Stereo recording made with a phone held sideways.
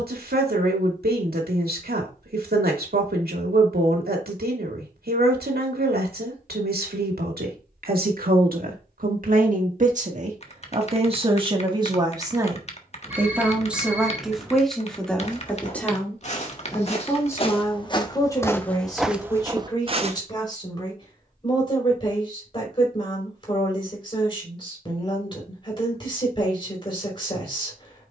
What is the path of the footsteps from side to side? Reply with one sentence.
You can hear the footsteps go from the left side to the right.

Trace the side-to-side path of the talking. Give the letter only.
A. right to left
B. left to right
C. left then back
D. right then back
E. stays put
A.